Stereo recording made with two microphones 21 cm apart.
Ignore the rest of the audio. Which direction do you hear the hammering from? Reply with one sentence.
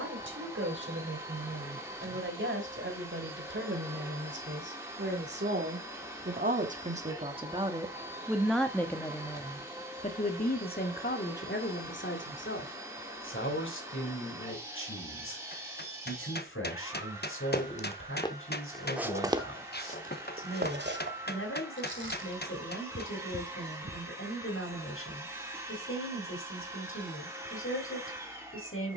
In this clip you hear the hammering on the left.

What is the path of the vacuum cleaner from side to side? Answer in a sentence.
In this clip you hear the vacuum cleaner stay in one place.